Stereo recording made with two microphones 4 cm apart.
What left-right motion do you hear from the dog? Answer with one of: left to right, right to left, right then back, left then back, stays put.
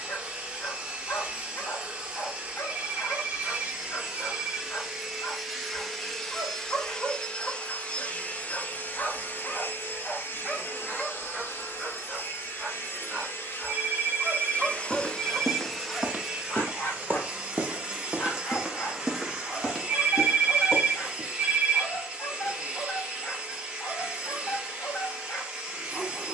right then back.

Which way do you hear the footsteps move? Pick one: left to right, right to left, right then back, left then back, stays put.
right then back.